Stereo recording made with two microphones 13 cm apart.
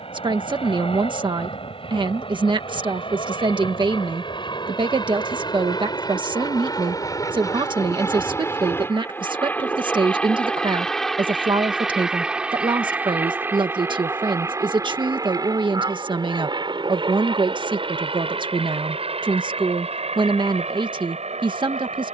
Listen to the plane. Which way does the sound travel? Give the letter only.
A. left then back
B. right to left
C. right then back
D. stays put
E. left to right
E.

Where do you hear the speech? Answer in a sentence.
In this clip you hear the speech on the right.